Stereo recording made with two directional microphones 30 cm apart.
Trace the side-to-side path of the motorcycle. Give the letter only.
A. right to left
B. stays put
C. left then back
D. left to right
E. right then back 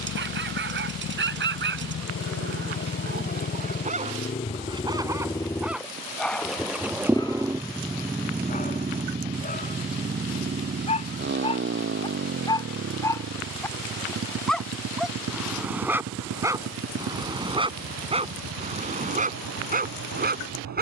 D.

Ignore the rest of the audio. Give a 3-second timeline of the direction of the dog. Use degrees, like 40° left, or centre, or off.
40° right, 20° right, 10° left, 20° left, 10° left, 10° right, 30° right.